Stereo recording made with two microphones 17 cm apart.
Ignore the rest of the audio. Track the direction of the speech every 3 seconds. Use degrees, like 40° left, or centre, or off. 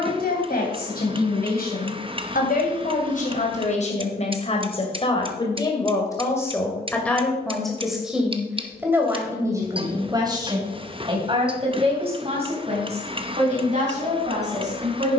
60° left, 40° left, centre, 20° right, 40° right.